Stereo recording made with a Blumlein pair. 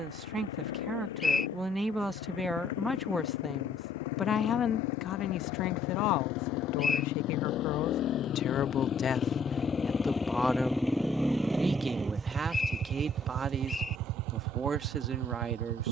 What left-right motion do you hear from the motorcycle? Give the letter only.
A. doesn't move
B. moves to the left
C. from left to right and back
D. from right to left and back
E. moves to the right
E.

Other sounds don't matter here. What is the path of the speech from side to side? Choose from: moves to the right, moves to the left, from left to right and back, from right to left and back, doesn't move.
from right to left and back.